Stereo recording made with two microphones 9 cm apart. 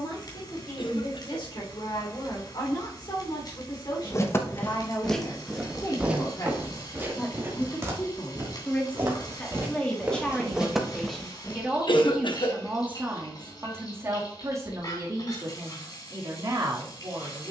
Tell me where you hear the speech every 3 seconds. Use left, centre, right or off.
left, left, left, centre, right, right.